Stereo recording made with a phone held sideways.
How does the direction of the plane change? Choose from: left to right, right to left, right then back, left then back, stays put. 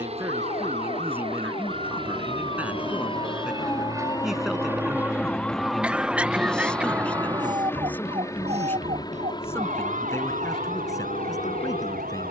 right to left.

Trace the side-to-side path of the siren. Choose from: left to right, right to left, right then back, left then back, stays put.
left to right.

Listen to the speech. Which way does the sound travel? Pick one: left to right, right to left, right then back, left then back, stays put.
right to left.